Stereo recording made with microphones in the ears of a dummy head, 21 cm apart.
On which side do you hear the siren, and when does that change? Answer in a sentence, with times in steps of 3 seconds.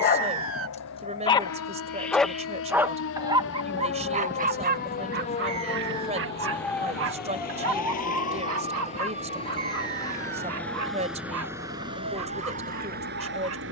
In this clip you hear the siren on the left from 0 s, in the centre from 6 s and on the right from 9 s.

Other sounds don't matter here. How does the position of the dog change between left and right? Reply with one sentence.
You can hear the dog go from the left side to the right.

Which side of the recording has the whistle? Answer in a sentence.
You can hear the whistle on the right.